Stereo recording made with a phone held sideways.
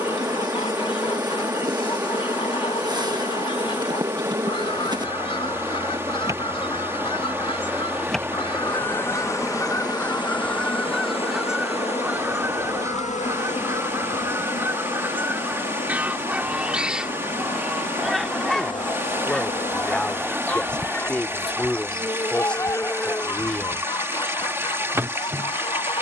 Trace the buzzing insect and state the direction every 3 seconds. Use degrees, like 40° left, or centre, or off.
30° right, 30° right, 10° right, 40° left, 60° left, 70° left, 60° left, 20° left, 20° right.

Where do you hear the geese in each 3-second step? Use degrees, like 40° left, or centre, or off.
40° left, 40° left, 40° left, 10° left, 20° right, 10° right, 10° left, 20° left, 30° left.